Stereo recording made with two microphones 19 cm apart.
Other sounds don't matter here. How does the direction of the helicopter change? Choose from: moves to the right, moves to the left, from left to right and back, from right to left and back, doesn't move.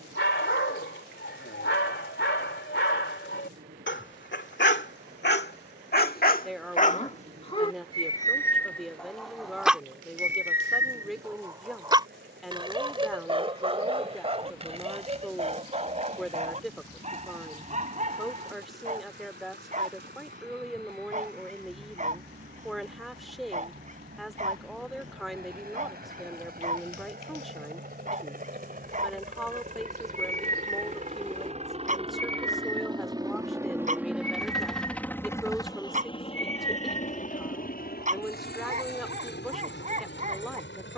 moves to the left.